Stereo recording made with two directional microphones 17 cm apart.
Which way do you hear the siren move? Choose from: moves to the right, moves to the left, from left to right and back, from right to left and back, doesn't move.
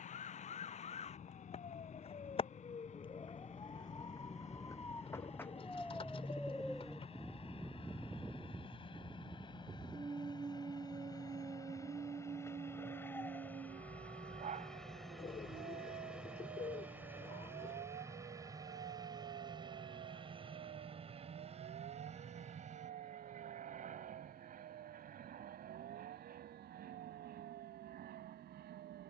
moves to the right.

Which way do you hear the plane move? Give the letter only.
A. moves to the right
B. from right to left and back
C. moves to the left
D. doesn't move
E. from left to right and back
A.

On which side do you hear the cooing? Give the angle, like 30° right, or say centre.
30° left.